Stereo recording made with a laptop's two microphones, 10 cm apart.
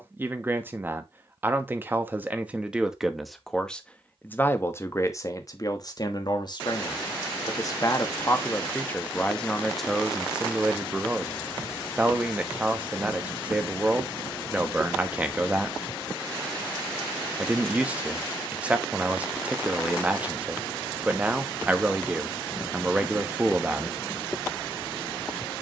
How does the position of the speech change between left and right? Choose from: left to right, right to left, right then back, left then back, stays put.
left then back.